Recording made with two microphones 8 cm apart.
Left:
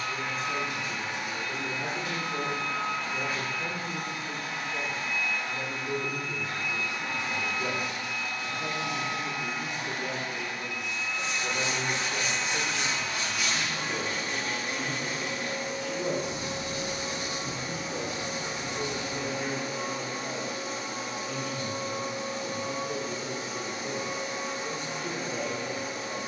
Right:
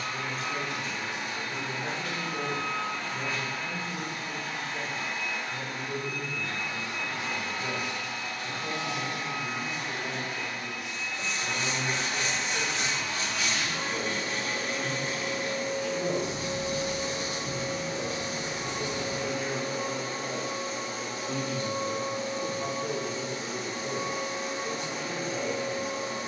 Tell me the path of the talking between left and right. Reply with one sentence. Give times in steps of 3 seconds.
In this clip you hear the talking on the left from 0 s, in the centre from 18 s, on the right from 21 s and on the left from 24 s.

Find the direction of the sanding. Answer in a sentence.
You can hear the sanding on the left.